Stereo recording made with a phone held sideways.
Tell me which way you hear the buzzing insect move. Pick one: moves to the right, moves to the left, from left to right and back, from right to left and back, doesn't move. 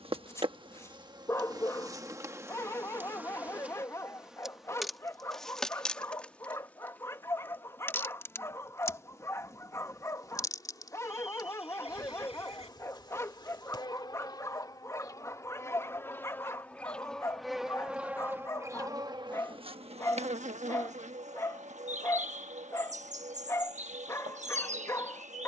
from right to left and back.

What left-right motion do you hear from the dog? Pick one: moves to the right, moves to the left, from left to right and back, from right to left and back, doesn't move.
doesn't move.